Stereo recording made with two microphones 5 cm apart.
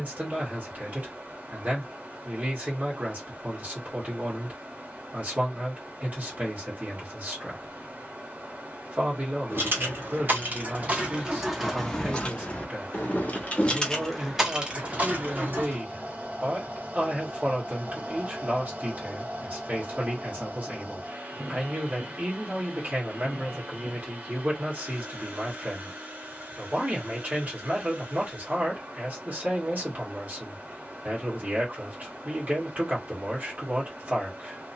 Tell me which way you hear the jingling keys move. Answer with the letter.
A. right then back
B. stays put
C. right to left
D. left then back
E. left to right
D.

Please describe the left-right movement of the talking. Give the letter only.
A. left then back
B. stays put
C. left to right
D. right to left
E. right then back
B.